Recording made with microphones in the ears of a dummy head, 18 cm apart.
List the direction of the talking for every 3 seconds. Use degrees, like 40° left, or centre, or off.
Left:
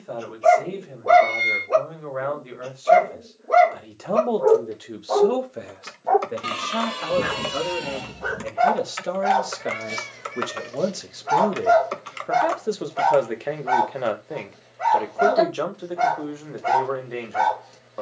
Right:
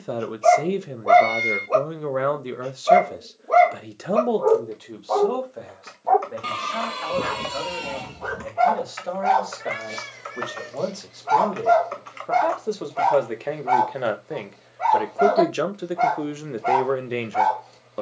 50° right, centre, 40° left, 30° left, centre, 30° right.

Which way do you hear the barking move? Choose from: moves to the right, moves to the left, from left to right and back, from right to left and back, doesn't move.
doesn't move.